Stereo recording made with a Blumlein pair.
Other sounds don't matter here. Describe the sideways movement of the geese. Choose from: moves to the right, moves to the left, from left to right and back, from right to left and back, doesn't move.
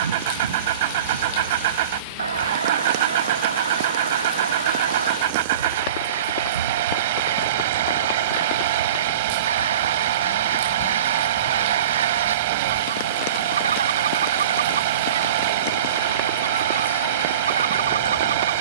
doesn't move.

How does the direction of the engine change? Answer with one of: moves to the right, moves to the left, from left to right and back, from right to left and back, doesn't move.
doesn't move.